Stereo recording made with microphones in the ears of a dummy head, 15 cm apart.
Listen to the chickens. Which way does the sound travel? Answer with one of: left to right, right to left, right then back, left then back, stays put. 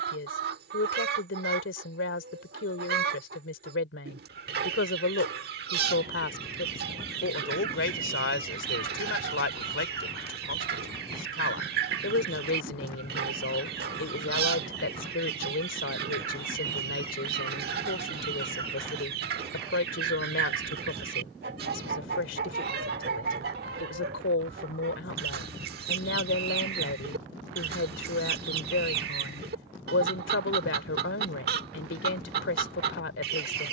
stays put.